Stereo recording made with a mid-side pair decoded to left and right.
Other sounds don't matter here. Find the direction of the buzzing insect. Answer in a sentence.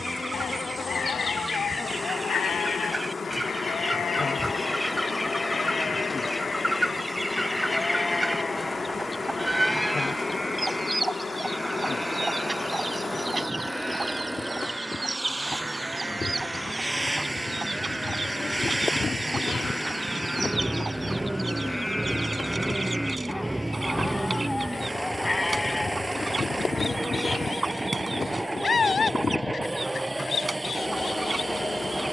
In this clip you hear the buzzing insect on the left.